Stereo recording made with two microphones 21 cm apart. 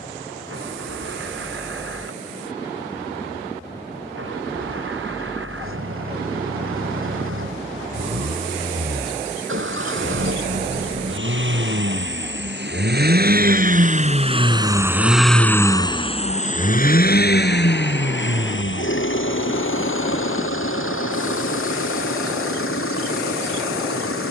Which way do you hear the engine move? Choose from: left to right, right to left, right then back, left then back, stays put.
right to left.